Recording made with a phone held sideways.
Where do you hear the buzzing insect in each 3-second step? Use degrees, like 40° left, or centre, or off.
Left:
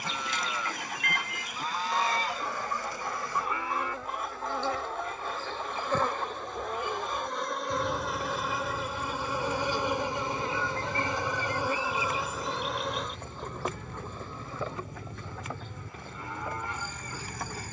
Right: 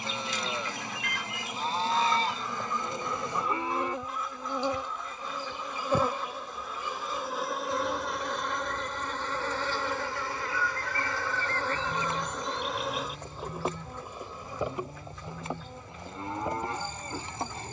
30° right, 20° right, centre, 20° left, 10° right, 20° right.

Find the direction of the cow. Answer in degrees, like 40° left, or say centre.
30° right.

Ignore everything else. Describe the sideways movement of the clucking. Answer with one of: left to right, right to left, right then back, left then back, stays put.
stays put.